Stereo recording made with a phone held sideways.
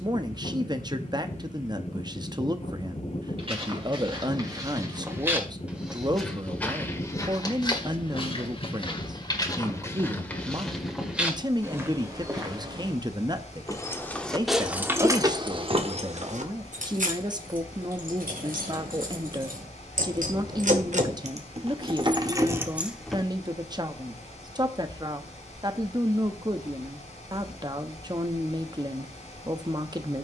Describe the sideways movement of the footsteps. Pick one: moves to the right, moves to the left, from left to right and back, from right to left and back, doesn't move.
from right to left and back.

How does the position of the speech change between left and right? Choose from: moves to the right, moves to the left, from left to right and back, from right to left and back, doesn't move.
doesn't move.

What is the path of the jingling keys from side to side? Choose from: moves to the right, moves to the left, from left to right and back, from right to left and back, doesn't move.
from left to right and back.